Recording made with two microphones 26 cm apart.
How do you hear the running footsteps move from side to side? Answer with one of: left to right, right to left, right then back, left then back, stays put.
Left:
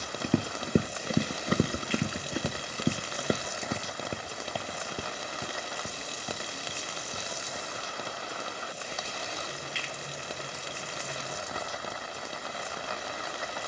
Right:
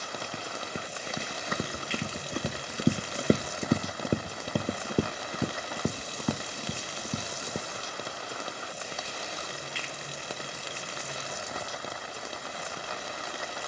left to right.